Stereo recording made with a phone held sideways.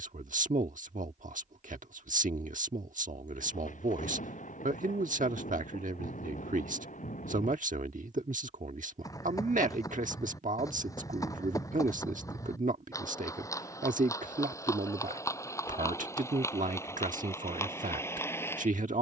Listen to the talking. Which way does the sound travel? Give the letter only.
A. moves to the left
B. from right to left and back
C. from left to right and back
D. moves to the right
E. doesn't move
E.